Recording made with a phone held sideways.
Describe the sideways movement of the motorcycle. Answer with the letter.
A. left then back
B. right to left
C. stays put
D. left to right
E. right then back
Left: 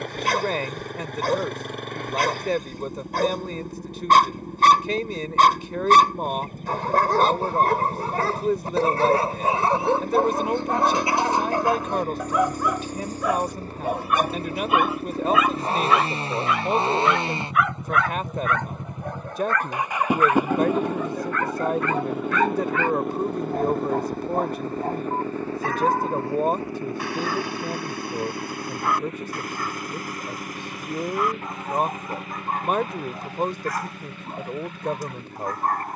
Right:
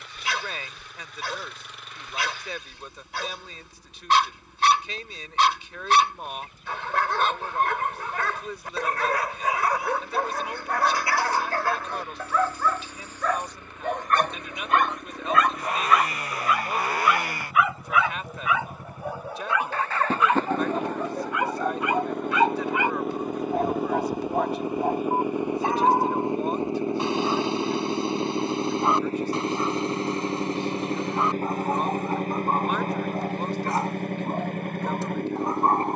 D.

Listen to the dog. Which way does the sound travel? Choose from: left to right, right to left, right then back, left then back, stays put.
left to right.